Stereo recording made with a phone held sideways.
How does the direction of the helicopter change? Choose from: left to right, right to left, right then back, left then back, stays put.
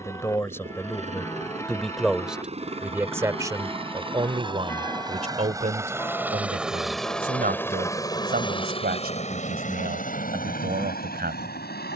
right to left.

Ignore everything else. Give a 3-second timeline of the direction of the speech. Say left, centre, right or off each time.
centre, right, right, right.